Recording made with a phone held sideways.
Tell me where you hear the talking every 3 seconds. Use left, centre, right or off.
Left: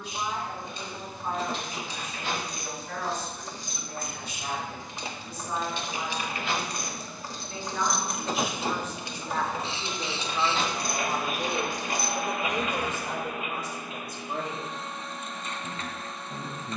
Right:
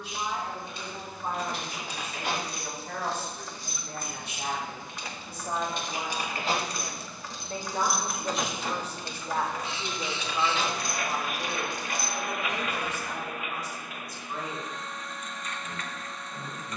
right, right, right, centre, left, left.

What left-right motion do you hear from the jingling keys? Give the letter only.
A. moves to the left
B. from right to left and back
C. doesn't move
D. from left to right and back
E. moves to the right
A.